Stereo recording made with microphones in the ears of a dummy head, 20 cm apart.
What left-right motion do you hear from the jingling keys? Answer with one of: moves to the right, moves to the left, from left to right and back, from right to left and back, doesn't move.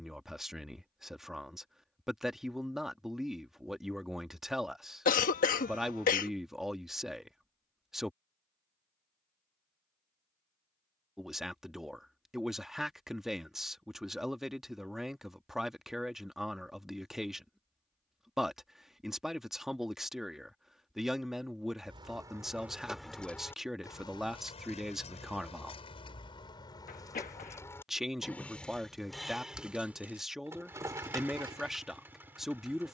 from right to left and back.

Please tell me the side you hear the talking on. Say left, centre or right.
centre.